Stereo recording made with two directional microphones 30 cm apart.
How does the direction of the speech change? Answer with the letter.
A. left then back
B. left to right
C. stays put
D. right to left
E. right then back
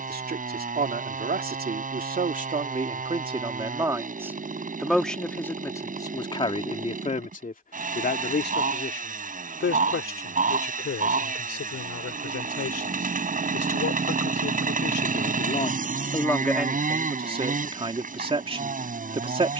A.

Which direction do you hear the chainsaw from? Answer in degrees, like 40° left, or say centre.
30° right.